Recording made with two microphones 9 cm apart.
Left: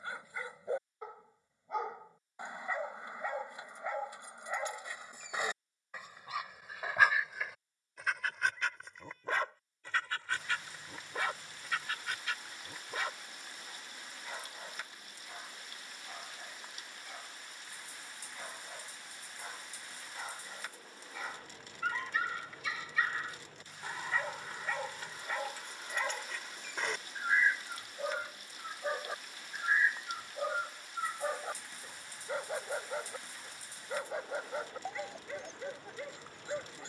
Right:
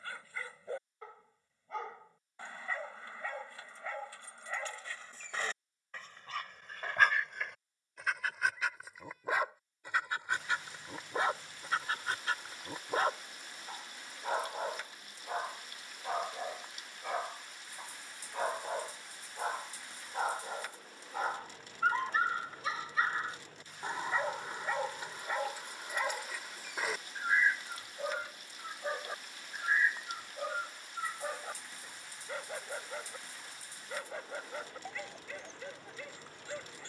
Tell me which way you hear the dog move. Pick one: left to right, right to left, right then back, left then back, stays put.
right then back.